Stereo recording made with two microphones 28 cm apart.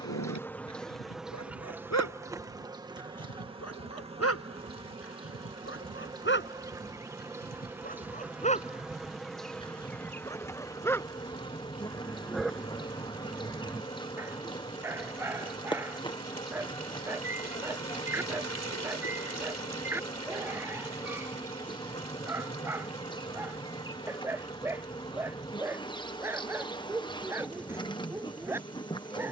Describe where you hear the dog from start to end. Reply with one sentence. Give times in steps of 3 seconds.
In this clip you hear the dog on the left from 0 s and in the centre from 9 s.